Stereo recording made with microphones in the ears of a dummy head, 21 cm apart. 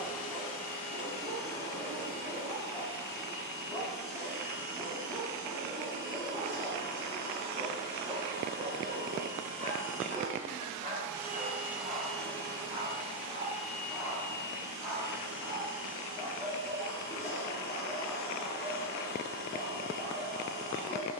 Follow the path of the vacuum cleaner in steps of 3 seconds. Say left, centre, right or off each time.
right, right, right, right, left, left, left.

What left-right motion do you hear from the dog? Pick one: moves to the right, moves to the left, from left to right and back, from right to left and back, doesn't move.
from left to right and back.